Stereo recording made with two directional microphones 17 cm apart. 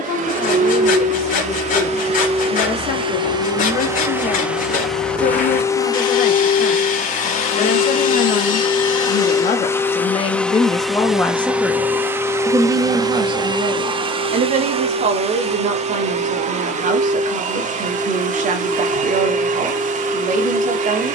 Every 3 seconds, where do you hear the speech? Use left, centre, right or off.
left, left, left, left, right, right, right.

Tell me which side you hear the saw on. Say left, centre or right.
left.